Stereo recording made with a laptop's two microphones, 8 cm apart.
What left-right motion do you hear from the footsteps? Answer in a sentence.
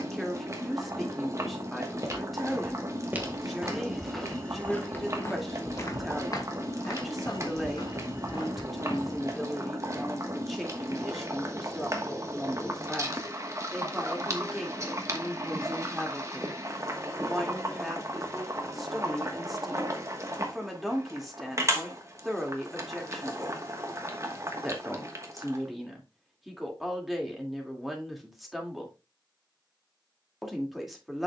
In this clip you hear the footsteps move to the left.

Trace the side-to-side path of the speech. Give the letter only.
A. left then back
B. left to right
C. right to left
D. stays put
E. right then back
D.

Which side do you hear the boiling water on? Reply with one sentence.
In this clip you hear the boiling water on the right.